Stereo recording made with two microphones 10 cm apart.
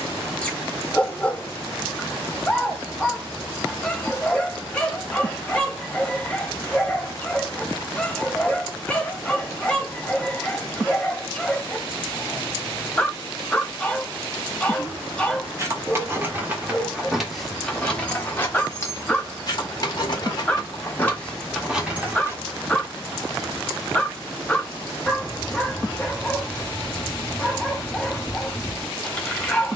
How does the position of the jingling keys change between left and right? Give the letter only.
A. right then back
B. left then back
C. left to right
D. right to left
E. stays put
B.